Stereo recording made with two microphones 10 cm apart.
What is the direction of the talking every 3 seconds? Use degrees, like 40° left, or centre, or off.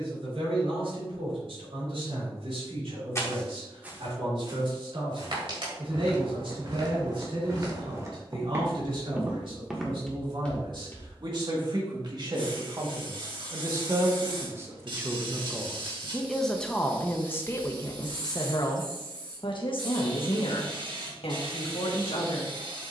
70° right, 70° right, 60° right, 50° right, 40° right, 10° left, 50° left, 70° left.